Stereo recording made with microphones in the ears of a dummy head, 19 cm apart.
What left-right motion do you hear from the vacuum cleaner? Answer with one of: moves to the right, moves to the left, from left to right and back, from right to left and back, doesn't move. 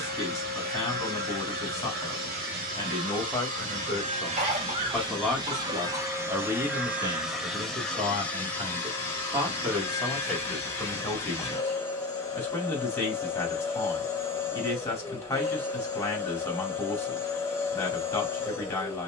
moves to the left.